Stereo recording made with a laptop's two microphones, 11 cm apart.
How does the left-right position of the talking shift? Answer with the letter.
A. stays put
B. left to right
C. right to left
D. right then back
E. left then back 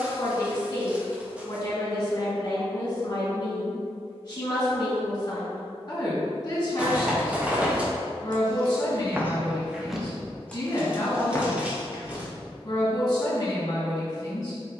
A.